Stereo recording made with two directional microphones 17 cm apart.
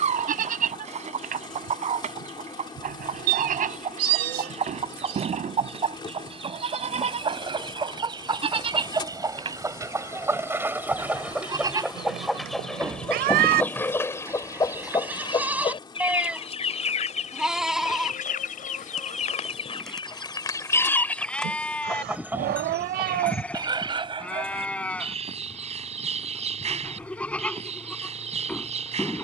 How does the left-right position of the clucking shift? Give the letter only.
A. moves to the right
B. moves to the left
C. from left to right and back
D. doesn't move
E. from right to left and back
E.